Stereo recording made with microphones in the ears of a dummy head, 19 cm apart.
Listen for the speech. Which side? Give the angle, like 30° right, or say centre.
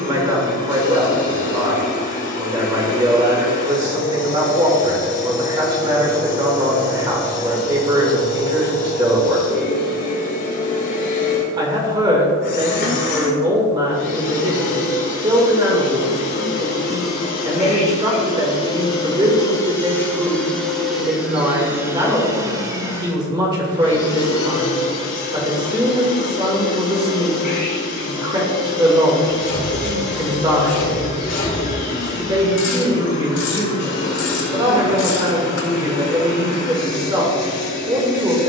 20° right.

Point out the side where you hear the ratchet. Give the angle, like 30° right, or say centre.
70° left.